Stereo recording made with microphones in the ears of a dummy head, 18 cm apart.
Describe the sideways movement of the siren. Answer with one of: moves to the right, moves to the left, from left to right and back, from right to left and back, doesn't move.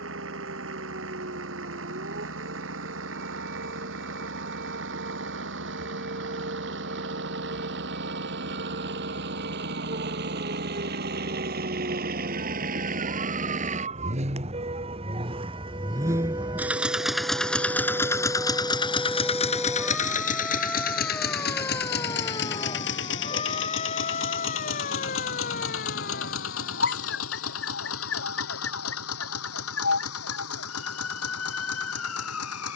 moves to the left.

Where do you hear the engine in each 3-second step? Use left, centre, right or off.
right, right, right, right, right, centre, left, left, left, left, left.